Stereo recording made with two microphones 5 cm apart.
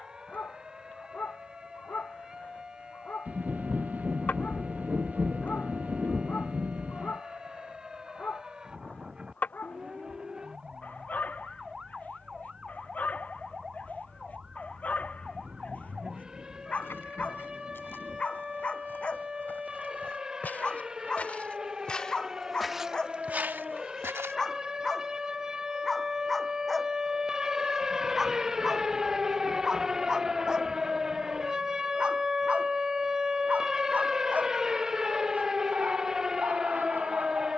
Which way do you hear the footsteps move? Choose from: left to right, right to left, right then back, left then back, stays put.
left to right.